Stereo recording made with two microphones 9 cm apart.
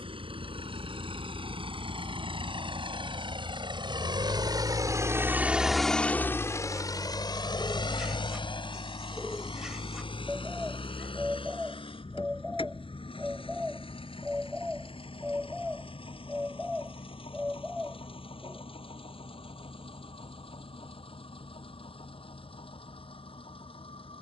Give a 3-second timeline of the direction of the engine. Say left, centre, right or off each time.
right, right, left, left, left, left, left, left.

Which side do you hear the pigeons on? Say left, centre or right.
centre.